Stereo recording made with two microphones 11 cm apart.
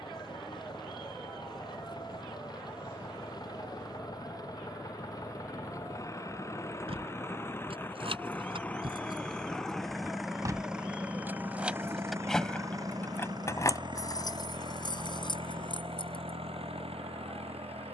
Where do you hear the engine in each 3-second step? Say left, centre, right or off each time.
left, left, left, centre, right, right.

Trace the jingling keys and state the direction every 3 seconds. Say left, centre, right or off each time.
off, off, right, right, left, left.